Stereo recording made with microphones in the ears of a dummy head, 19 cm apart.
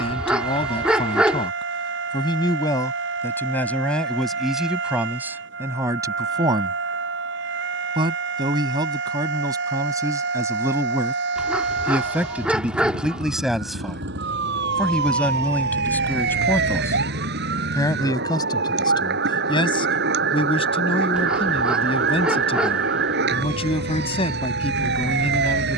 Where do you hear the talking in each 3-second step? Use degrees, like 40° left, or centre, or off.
20° left, centre, 20° right, 10° right, centre, 10° left, 20° left, 30° left, 30° left.